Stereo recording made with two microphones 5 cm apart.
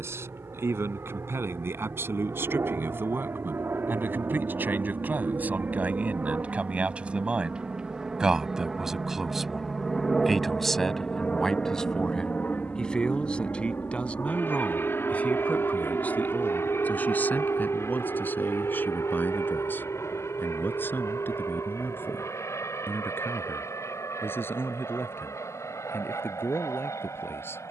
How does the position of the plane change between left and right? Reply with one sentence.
You can hear the plane go from the right side to the left.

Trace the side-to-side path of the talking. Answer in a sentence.
In this clip you hear the talking go from the right side to the left.